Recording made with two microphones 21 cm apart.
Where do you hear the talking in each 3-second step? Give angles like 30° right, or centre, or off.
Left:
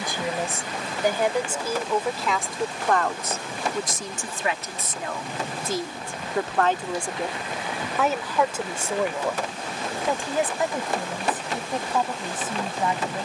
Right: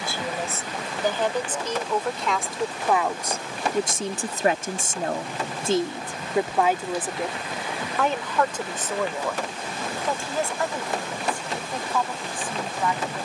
10° left, 30° right, centre, 20° left, 20° left.